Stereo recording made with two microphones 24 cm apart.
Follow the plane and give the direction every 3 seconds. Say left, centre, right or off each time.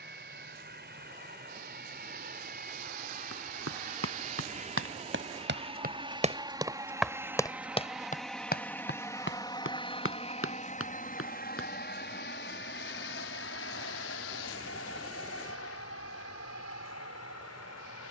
right, right, centre, left, left, left.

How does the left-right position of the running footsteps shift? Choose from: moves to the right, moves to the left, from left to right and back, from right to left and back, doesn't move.
moves to the left.